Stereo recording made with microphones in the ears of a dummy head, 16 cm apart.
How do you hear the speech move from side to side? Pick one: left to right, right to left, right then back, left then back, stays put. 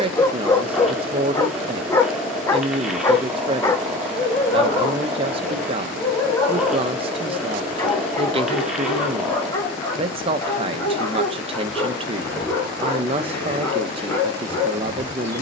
stays put.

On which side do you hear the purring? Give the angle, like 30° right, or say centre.
centre.